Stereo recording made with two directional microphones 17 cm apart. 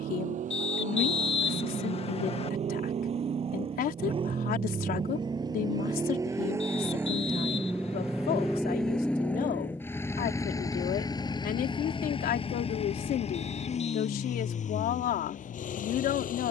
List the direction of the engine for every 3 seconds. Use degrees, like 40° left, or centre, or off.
50° right, 30° right, 10° right, 20° left, 40° left, 50° left.